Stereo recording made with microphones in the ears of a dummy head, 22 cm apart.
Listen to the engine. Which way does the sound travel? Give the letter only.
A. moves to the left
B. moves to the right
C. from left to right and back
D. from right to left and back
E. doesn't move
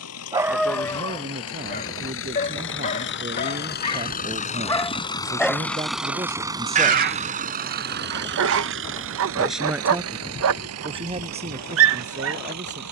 B.